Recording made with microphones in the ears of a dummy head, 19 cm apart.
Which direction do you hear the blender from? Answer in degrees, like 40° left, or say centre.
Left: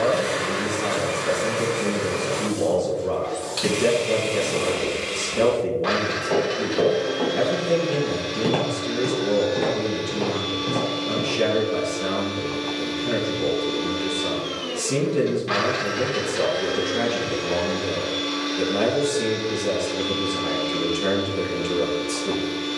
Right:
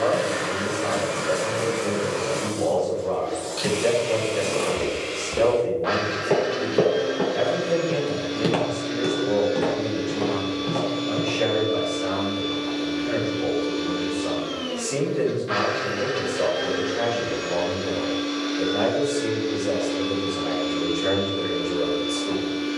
60° left.